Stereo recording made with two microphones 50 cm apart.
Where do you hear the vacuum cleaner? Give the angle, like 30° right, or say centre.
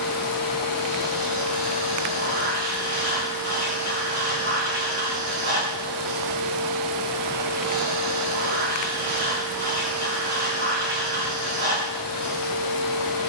80° right.